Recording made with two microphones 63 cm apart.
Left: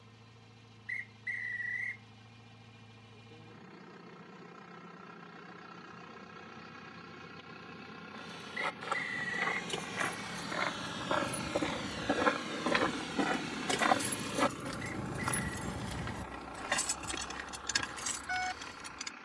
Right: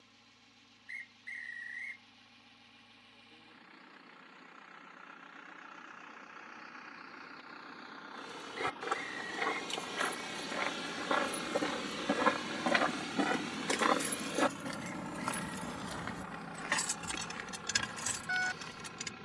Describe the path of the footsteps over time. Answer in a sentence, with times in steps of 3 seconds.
In this clip you hear the footsteps not at all from 0 s, on the right from 6 s, in the centre from 12 s and on the left from 15 s.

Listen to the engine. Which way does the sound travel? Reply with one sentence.
In this clip you hear the engine go from the left side to the right.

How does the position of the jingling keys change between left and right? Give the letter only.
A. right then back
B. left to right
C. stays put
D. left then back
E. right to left
B.